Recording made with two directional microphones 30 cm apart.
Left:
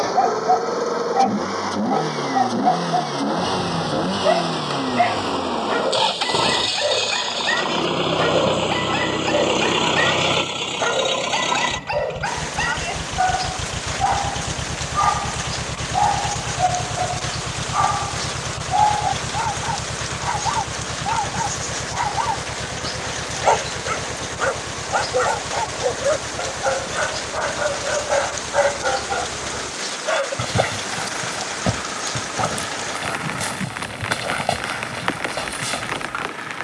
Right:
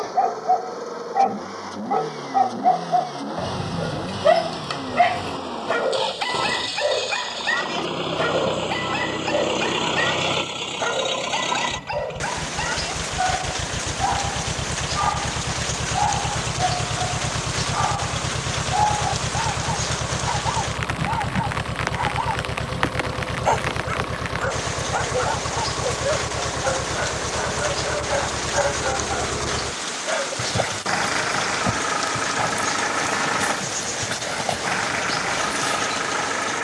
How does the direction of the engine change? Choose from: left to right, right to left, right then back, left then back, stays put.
left to right.